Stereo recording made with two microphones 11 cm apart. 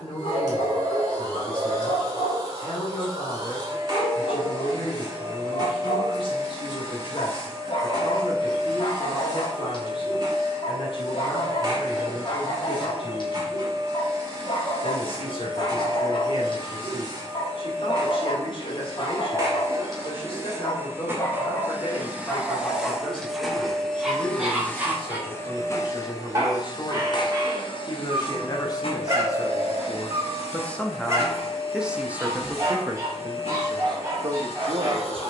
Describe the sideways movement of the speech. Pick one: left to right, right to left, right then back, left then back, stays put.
left to right.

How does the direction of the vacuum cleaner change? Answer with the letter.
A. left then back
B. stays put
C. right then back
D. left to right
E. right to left
E.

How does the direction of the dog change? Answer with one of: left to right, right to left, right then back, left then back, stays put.
left to right.